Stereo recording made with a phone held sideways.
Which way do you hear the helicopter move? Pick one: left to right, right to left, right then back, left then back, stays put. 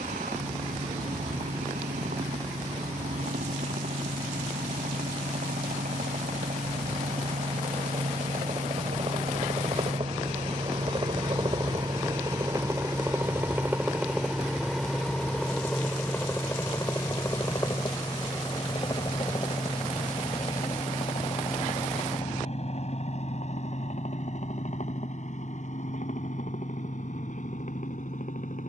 right to left.